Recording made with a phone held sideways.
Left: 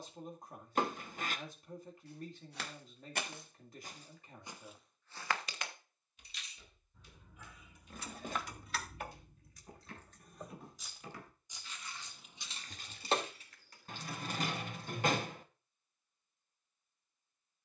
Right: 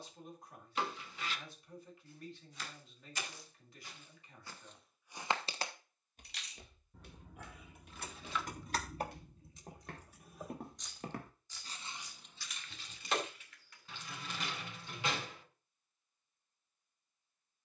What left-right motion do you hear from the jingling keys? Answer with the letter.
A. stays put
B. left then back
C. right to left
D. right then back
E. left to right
C.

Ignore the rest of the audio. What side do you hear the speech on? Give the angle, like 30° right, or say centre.
40° left.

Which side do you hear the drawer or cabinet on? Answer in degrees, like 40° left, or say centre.
50° left.